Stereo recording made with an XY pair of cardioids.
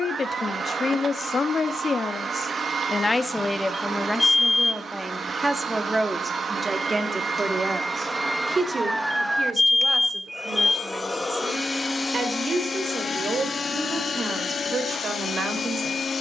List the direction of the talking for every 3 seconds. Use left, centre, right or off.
left, centre, right, right, right, right.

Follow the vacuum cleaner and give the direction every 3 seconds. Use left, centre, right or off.
right, right, right, centre, left, left.